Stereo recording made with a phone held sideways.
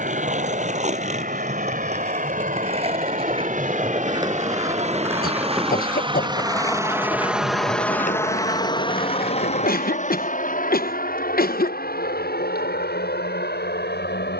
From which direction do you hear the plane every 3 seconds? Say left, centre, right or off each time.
right, right, centre, left, left.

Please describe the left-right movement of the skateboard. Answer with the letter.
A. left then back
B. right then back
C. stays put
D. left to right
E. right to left
E.